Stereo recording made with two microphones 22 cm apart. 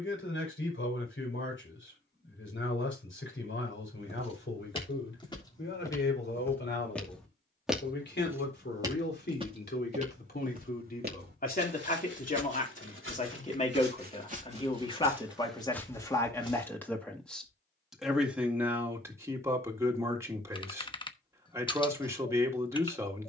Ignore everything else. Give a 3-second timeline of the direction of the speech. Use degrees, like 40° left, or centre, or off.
60° left, 60° left, 50° left, 40° left, 30° left, 10° left, 10° right, 10° right.